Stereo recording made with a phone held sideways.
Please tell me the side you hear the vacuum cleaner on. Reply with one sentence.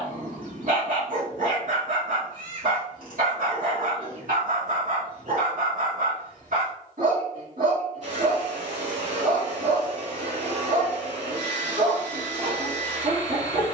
You can hear the vacuum cleaner on the right.